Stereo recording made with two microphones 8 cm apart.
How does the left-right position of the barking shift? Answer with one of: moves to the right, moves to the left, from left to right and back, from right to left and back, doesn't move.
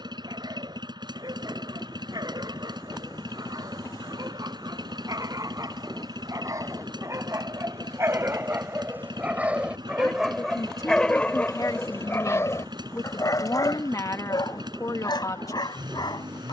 moves to the left.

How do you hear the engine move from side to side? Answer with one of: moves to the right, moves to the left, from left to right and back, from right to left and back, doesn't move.
doesn't move.